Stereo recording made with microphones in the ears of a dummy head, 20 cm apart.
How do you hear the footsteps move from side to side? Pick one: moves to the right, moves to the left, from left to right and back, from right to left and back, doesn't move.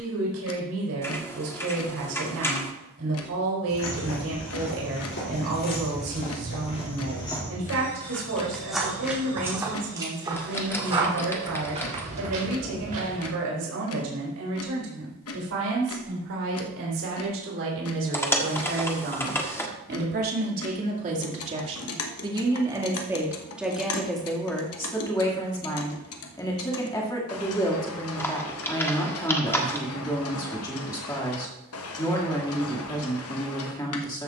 moves to the right.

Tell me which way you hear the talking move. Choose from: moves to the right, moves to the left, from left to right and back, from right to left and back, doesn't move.
moves to the left.